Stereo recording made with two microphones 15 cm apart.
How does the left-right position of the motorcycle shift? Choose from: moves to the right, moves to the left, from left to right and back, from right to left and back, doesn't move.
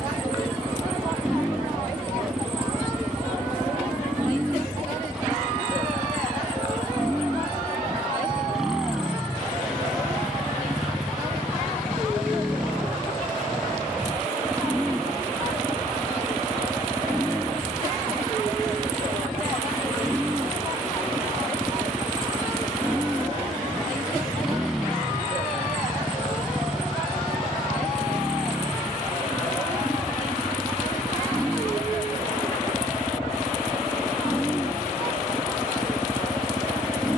doesn't move.